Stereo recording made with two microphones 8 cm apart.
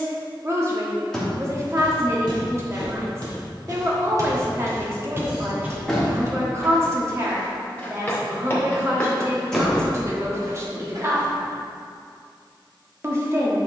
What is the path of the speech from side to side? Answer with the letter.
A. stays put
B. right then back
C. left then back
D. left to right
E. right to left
A.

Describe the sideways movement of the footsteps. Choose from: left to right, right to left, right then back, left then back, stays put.
left then back.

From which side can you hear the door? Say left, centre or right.
centre.